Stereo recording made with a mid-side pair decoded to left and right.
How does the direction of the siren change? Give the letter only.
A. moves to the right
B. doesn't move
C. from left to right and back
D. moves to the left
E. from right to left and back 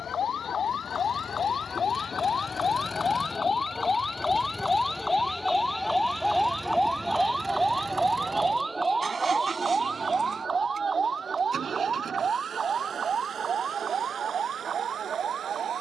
A.